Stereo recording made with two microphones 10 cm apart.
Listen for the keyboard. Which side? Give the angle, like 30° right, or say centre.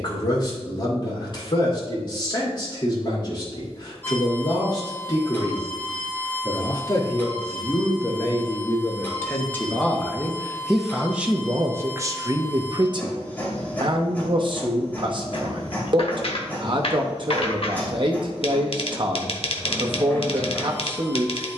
60° left.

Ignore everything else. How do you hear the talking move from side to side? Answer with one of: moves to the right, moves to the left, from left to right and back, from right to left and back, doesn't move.
moves to the right.